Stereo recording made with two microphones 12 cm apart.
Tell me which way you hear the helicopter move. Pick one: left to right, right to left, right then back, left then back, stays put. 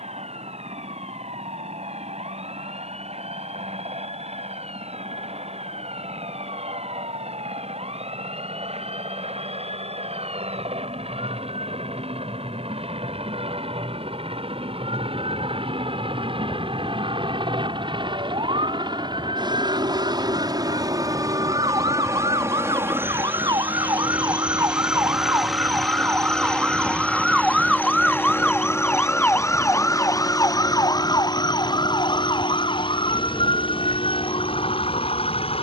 right to left.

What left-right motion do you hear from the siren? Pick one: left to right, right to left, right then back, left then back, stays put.
right to left.